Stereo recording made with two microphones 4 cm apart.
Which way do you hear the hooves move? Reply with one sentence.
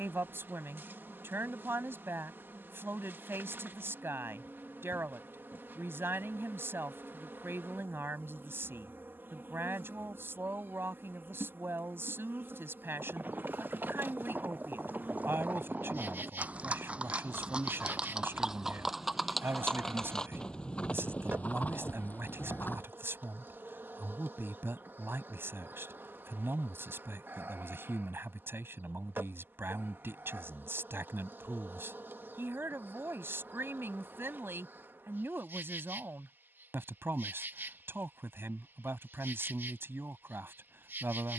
You can hear the hooves go from the right side to the left.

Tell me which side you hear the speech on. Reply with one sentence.
In this clip you hear the speech on the right.